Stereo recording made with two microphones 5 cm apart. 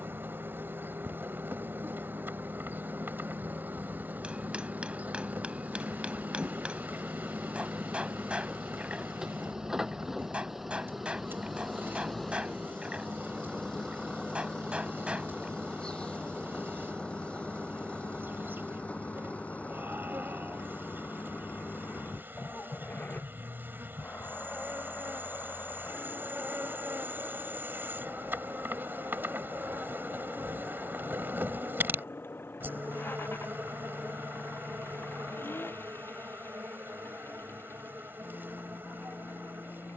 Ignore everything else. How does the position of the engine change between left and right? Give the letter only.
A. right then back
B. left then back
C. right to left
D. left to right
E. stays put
C.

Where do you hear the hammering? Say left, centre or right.
right.